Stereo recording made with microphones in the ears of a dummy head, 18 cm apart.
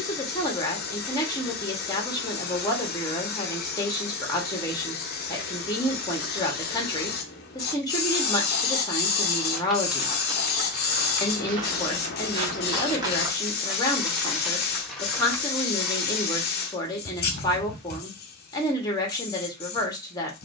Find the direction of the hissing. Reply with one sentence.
You can hear the hissing on the left.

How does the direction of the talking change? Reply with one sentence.
You can hear the talking stay put.